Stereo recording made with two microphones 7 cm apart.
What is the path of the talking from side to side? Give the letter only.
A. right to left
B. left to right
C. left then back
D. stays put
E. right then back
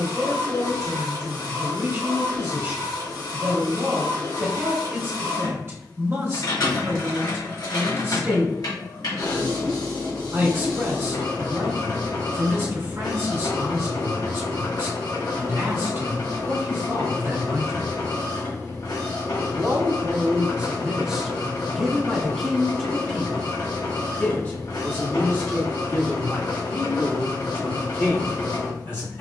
A.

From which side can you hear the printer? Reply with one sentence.
You can hear the printer on the left.